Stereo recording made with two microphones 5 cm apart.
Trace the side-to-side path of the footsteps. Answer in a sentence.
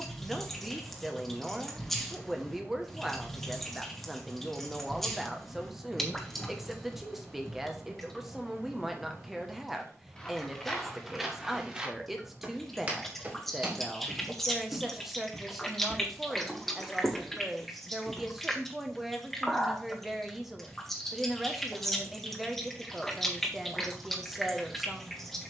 In this clip you hear the footsteps go right and come back.